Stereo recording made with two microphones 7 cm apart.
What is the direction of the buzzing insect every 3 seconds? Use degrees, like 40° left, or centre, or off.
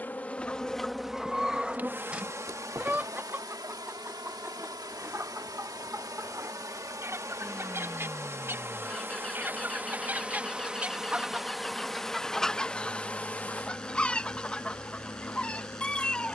20° right, 60° right, 40° right, 10° right, 20° left, 40° left.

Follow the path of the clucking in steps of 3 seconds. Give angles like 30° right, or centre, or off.
centre, 30° right, 40° right, 20° right, 10° left, 10° left.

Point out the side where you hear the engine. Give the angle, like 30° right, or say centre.
10° left.